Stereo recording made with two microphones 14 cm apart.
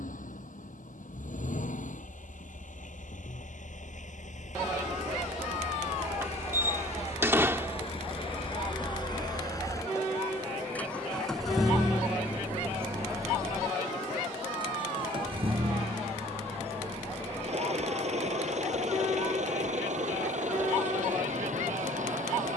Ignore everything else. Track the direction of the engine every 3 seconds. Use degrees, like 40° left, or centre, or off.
70° left, 60° left, 50° left, 10° left, 20° right, 50° right, 60° right, 60° right.